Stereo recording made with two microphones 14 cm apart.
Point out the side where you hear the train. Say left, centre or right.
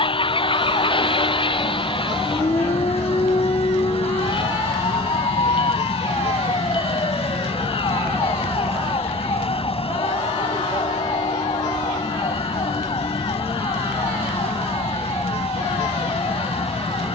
left.